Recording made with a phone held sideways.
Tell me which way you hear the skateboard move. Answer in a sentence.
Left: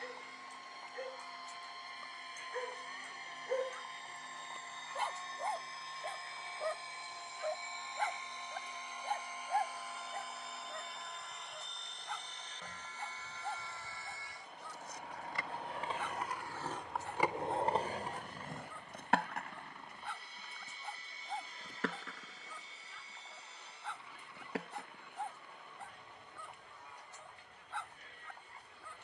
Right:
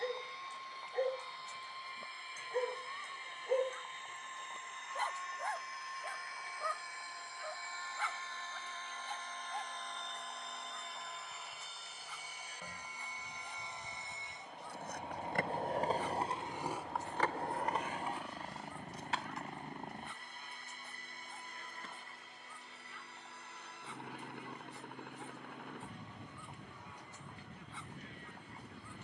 In this clip you hear the skateboard go from the right side to the left.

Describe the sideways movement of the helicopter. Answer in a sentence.
In this clip you hear the helicopter move from left to right.